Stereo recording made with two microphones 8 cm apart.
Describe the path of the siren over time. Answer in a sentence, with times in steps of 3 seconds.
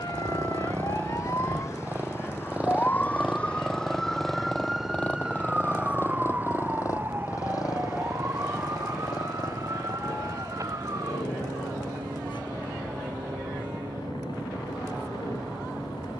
In this clip you hear the siren on the left from 0 s, in the centre from 3 s and on the right from 6 s.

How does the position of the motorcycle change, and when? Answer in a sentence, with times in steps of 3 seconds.
You can hear the motorcycle on the right from 0 s, in the centre from 3 s and on the left from 6 s.